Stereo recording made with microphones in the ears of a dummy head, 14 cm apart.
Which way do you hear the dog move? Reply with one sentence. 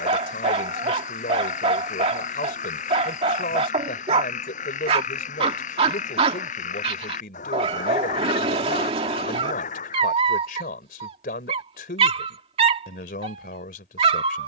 In this clip you hear the dog stay in one place.